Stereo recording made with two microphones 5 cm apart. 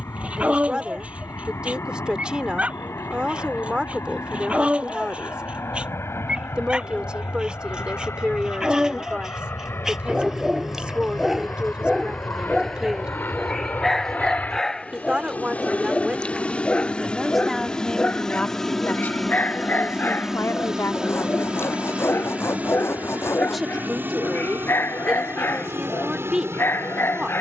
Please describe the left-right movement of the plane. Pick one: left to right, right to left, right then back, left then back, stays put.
left to right.